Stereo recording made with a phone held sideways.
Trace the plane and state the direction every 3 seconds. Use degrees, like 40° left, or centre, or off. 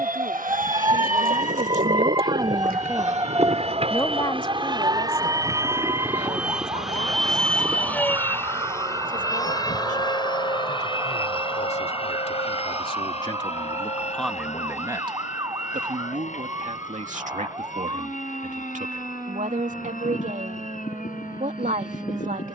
60° right, 30° right, centre, 30° left, 40° left, 50° left, 50° left, 50° left.